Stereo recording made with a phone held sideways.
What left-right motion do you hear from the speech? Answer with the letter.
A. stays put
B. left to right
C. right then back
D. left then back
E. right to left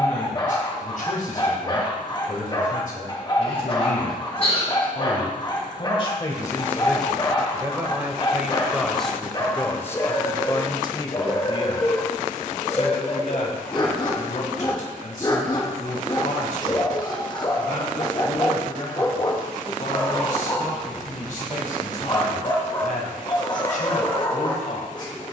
C.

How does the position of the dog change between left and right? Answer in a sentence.
In this clip you hear the dog stay put.